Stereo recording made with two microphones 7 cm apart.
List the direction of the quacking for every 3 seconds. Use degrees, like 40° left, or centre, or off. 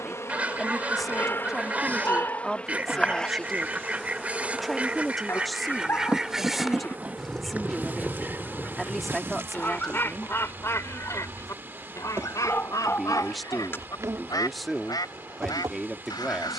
20° right, 20° right, 10° left, 30° left, 50° left, 60° left.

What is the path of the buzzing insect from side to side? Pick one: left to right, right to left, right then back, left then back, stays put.
left to right.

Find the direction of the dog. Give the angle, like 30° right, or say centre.
30° left.